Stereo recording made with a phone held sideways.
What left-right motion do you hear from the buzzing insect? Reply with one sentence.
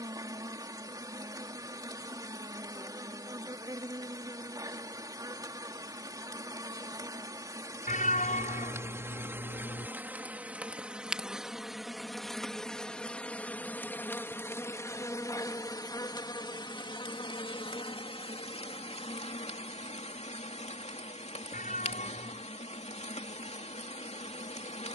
In this clip you hear the buzzing insect move from right to left.